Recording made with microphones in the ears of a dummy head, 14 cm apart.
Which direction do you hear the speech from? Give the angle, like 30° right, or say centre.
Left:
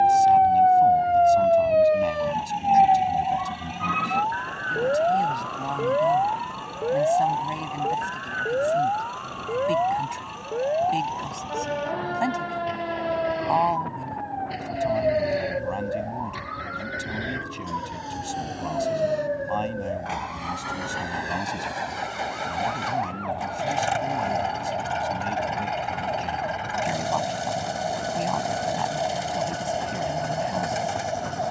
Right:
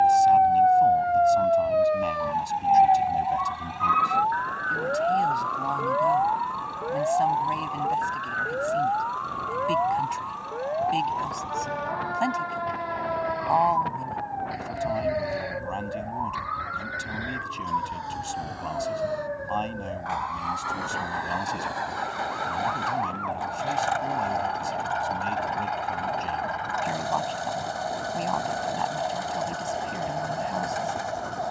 centre.